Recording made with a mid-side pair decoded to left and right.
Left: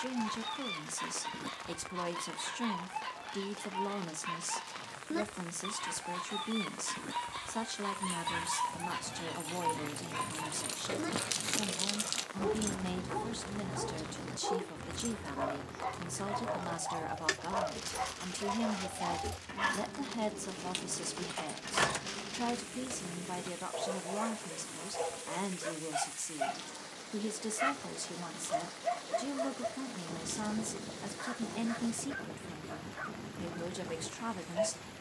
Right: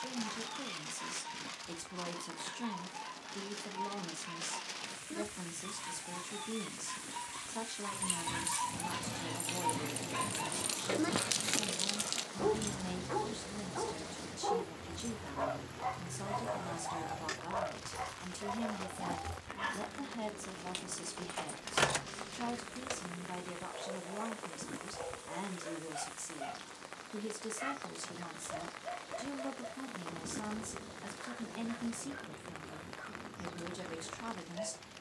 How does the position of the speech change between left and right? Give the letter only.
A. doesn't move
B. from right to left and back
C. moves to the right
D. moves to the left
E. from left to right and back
A.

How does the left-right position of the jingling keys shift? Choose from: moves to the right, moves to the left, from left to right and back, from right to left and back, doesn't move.
from right to left and back.